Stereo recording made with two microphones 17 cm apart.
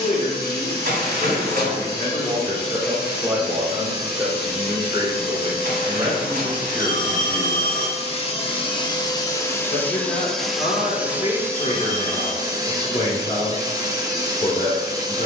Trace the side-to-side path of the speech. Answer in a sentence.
You can hear the speech move from left to right and back again.